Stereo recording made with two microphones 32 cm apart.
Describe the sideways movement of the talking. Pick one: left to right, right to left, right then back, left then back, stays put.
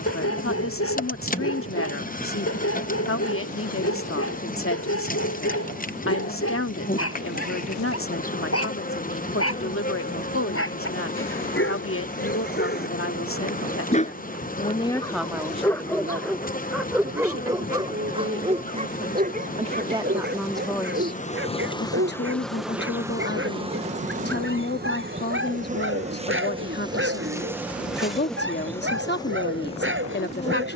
right then back.